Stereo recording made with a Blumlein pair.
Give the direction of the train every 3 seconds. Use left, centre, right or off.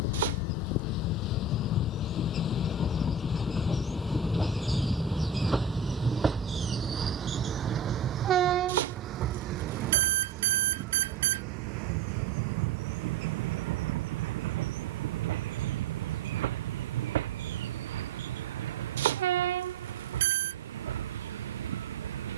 left, centre, right, right, right, right, right, right.